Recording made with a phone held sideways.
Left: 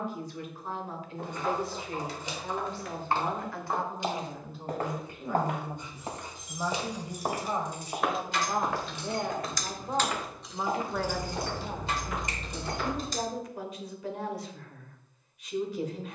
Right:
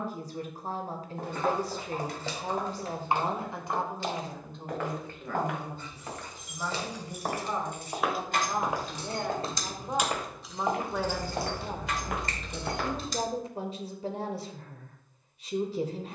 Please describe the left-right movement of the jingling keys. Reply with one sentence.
In this clip you hear the jingling keys travel towards the left.